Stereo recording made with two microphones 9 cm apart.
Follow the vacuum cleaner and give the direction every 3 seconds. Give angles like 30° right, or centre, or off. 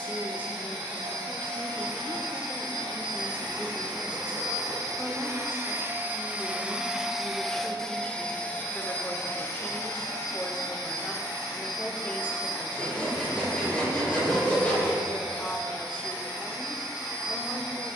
70° right, 40° right, centre, 40° left, 60° left, 60° left.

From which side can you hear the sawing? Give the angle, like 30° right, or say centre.
20° left.